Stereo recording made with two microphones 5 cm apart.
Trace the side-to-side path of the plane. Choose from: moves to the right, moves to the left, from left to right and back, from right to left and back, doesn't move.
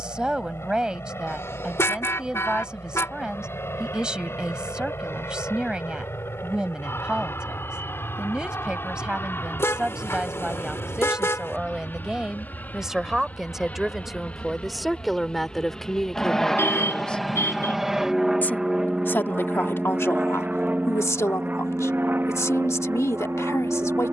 moves to the right.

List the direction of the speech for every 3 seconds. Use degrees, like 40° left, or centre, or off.
20° right, 20° right, 20° right, 10° right, centre, 10° left, 60° left, 80° left.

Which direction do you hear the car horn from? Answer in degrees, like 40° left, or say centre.
60° left.